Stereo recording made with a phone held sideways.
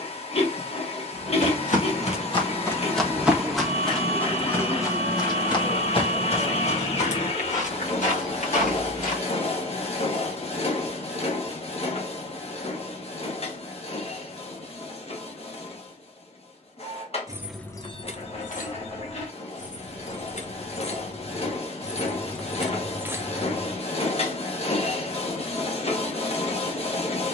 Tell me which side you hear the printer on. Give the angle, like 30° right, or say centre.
40° left.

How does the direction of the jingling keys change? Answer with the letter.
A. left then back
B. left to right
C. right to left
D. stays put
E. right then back
A.